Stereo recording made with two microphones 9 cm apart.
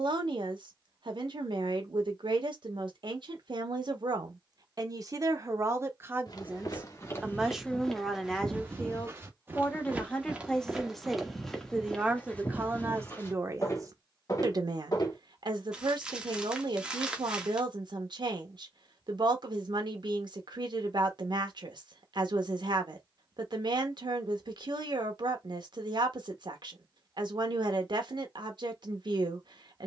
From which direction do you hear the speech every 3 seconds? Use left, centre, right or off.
right, right, centre, centre, right, right, right, right, right, right.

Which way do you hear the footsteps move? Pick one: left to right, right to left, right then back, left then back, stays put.
right then back.